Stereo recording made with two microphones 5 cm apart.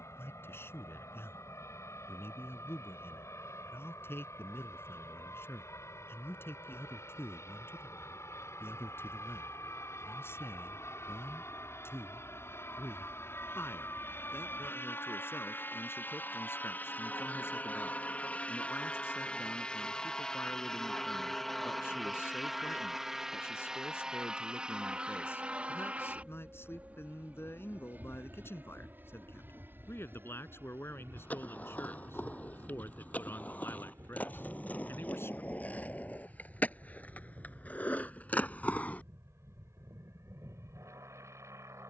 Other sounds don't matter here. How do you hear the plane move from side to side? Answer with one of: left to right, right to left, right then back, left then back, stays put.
left to right.